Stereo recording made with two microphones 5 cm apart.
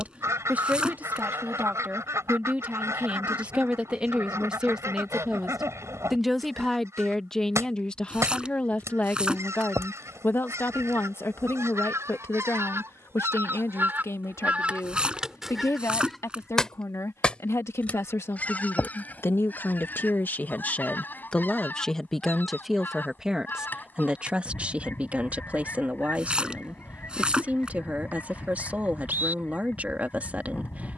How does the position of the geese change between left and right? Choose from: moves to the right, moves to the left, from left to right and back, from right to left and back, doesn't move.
moves to the left.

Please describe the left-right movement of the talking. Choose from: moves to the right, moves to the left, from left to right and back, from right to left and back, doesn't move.
from right to left and back.